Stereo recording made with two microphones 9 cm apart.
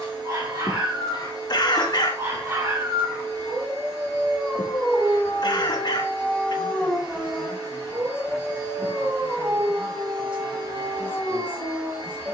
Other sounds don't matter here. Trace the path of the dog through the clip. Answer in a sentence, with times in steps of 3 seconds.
In this clip you hear the dog on the right from 0 s, in the centre from 3 s and on the right from 9 s.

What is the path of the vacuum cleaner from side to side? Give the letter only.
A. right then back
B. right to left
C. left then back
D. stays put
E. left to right
D.